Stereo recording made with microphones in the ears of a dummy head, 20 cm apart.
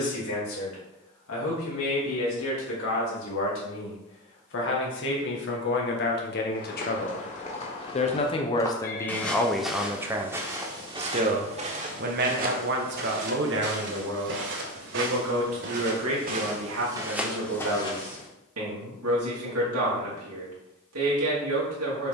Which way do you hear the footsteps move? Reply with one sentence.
In this clip you hear the footsteps go right and come back.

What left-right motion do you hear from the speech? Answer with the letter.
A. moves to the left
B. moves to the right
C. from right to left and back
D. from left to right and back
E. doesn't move
B.